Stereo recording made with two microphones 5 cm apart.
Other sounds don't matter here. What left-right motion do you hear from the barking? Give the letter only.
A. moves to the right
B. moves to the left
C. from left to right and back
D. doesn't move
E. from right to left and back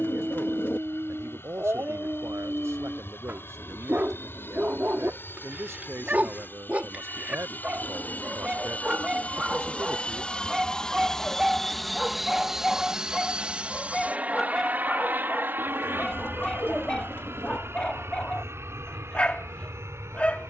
B.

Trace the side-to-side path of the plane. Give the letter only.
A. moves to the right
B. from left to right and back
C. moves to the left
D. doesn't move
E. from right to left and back
A.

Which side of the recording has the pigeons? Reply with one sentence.
In this clip you hear the pigeons on the left.